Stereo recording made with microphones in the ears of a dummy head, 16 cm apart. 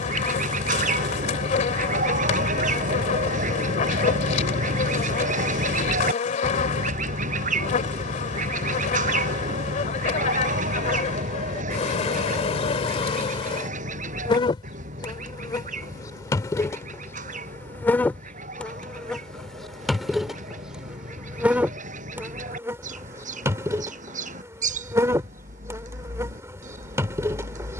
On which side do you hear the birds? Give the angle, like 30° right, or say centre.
40° right.